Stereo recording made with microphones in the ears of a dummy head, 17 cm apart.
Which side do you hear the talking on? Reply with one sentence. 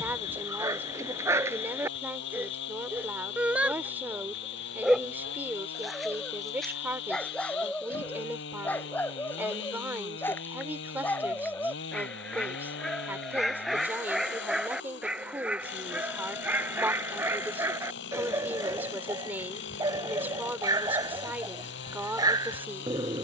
You can hear the talking in the centre.